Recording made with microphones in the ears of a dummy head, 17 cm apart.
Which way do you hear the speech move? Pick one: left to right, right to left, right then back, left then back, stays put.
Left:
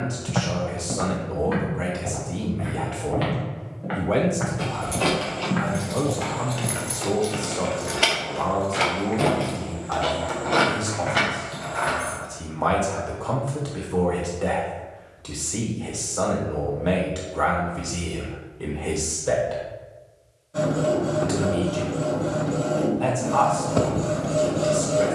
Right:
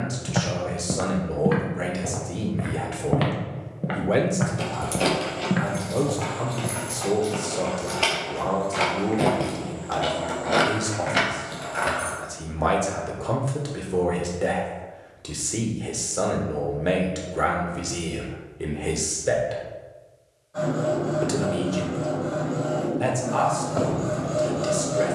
stays put.